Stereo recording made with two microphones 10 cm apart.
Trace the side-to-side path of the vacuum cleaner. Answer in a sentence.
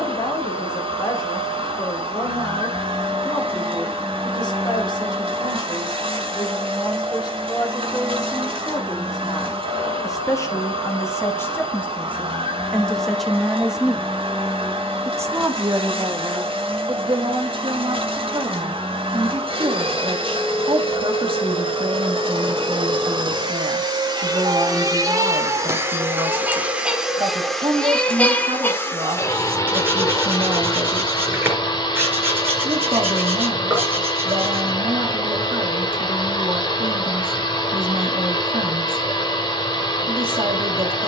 In this clip you hear the vacuum cleaner move from right to left.